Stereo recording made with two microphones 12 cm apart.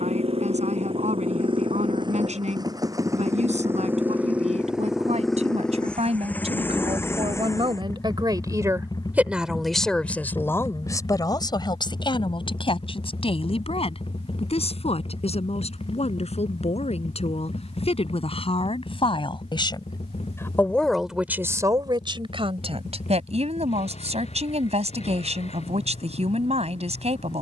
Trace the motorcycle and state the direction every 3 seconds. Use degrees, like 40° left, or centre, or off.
50° right, 10° right, 20° left, 40° left, 50° left, 50° left, 60° left, 60° left, 60° left.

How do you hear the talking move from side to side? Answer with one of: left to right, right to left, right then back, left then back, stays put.
left then back.